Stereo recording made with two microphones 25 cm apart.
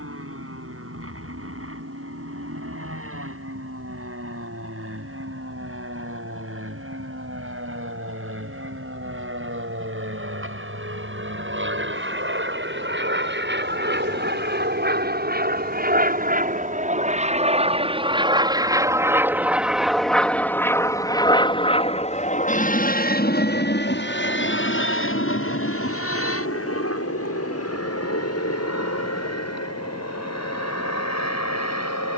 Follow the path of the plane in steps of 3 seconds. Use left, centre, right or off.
right, right, right, right, right, right, centre, left, left, left, left.